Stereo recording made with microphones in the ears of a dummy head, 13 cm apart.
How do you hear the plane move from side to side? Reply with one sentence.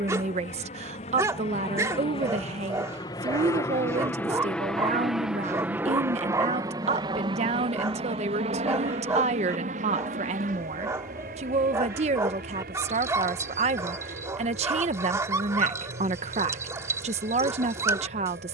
In this clip you hear the plane travel towards the right.